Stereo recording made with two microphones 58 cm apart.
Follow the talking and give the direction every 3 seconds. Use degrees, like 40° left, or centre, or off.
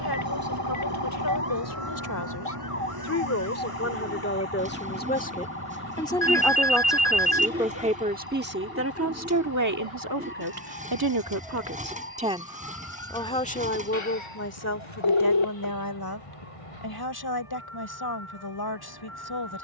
30° left, 20° left, 10° right, 30° right, 10° left, 40° left, 40° left.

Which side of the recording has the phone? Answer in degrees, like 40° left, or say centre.
50° left.